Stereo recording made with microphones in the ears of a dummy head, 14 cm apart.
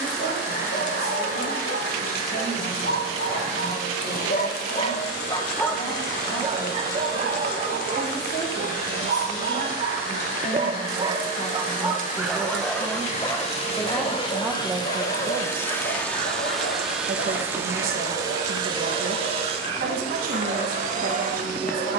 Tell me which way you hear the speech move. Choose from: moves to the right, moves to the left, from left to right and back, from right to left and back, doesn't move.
moves to the right.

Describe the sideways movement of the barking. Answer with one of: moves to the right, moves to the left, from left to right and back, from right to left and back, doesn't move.
from left to right and back.